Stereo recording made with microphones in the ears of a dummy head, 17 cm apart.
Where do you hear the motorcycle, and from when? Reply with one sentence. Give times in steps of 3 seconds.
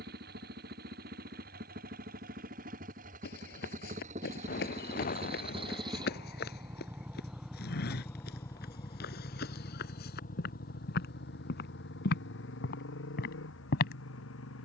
You can hear the motorcycle on the right from 0 s, in the centre from 6 s and on the left from 9 s.